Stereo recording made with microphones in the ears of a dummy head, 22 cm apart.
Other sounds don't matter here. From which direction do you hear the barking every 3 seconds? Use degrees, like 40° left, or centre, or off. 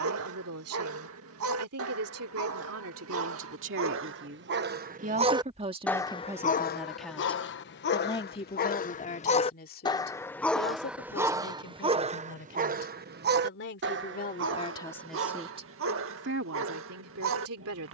70° right, 50° right, 40° left, centre, 50° right, 60° right.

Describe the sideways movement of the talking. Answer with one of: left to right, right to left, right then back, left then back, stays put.
left then back.